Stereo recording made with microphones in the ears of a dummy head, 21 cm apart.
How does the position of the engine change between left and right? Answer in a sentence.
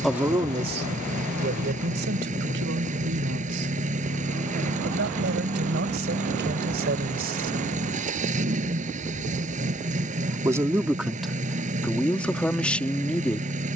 You can hear the engine stay in one place.